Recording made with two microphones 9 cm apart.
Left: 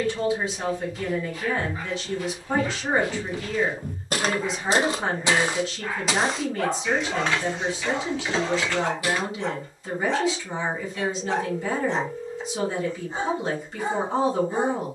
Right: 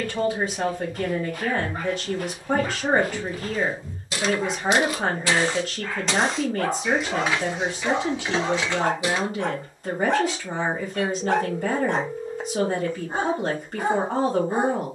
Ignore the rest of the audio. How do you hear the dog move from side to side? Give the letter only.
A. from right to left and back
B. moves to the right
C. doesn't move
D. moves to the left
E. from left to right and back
A.